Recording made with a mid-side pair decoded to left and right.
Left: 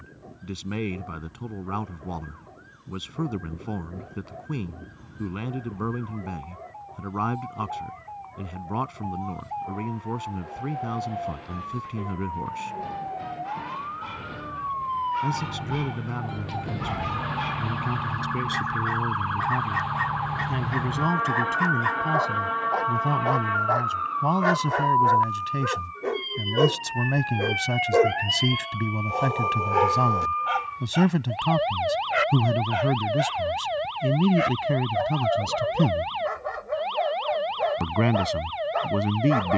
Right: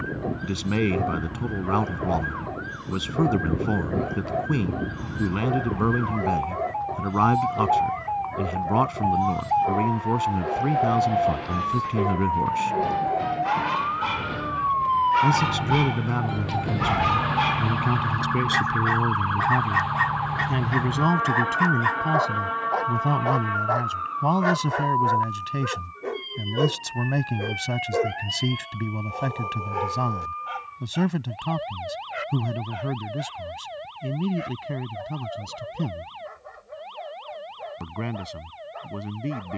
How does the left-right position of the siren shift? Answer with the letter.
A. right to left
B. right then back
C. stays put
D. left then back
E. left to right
A.